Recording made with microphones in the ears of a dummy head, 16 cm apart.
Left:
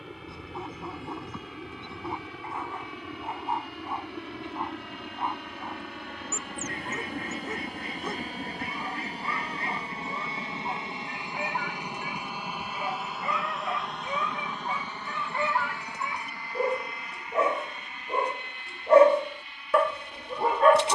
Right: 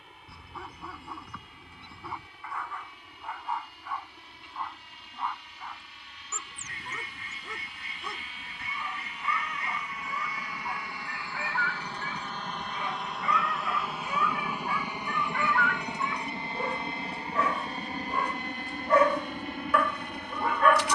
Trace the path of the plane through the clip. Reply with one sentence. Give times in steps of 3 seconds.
In this clip you hear the plane on the left from 0 s, in the centre from 12 s and on the right from 15 s.